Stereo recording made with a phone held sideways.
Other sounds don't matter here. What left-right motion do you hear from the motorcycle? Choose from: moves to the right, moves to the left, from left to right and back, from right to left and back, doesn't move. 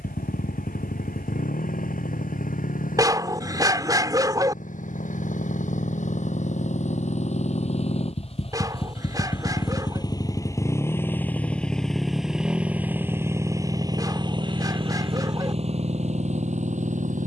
moves to the right.